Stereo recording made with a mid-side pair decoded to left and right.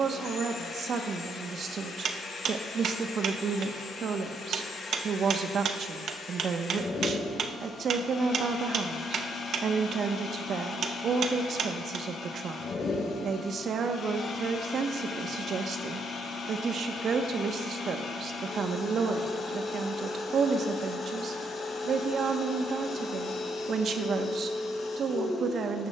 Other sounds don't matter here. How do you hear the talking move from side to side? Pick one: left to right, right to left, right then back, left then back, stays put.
stays put.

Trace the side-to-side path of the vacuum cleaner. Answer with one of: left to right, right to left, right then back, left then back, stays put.
stays put.